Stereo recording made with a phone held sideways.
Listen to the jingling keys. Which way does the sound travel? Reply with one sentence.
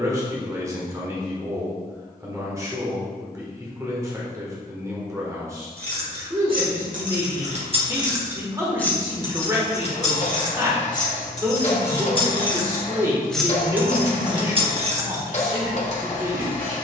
In this clip you hear the jingling keys go left and come back.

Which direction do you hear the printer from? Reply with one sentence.
You can hear the printer on the left.